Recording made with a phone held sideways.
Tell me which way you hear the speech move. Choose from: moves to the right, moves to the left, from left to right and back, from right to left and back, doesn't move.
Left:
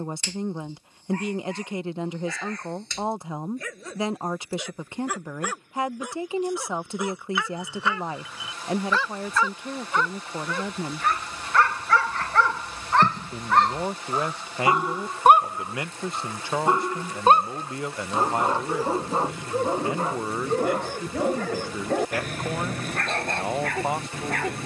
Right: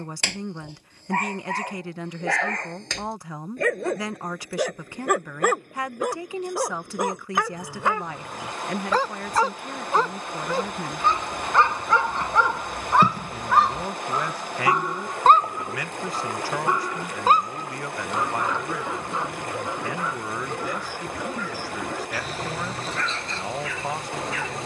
doesn't move.